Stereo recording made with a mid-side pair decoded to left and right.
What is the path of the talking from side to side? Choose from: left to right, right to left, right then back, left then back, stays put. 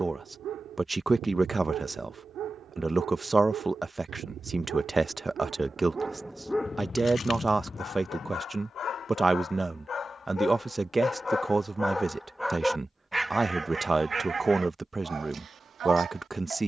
stays put.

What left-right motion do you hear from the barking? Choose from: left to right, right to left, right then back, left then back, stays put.
left then back.